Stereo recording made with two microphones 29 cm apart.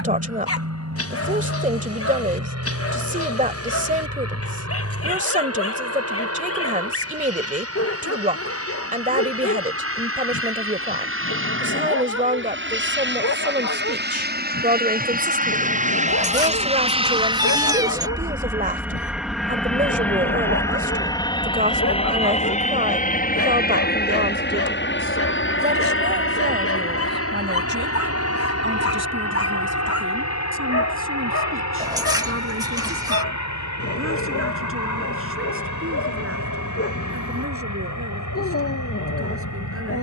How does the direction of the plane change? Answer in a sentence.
In this clip you hear the plane move from right to left.